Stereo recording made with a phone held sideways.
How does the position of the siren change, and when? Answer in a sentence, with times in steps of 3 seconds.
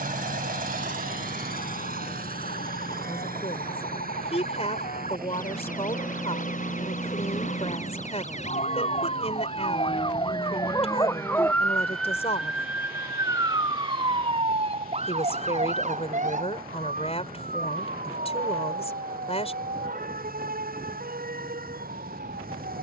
You can hear the siren on the left from 0 s and on the right from 12 s.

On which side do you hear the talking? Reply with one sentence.
You can hear the talking on the left.